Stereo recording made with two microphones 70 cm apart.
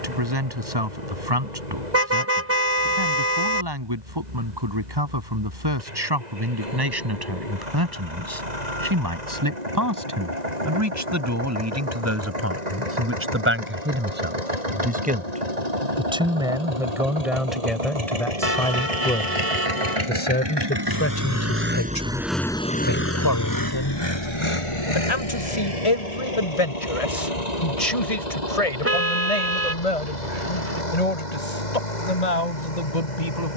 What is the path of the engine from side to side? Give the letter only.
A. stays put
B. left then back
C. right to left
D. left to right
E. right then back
C.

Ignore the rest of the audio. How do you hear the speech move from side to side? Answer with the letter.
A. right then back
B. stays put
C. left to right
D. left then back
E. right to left
E.